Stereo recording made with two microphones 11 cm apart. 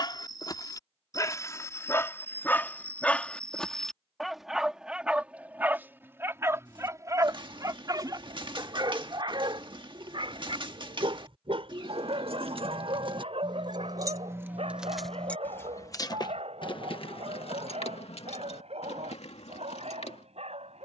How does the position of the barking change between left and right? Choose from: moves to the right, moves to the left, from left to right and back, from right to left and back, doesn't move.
moves to the right.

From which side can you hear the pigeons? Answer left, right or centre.
right.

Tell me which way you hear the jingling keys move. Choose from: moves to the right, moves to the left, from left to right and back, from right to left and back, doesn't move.
moves to the left.